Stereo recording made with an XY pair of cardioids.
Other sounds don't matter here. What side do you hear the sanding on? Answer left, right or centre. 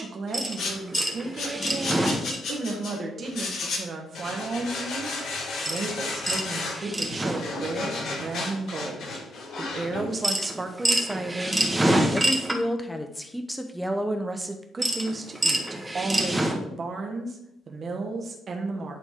left.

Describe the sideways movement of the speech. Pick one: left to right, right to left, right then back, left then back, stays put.
left then back.